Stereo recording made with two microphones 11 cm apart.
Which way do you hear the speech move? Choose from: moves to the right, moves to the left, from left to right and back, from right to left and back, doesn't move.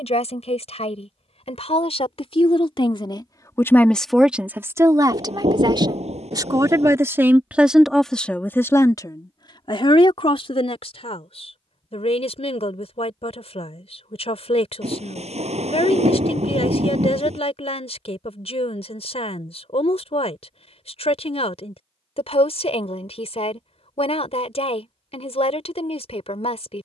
from left to right and back.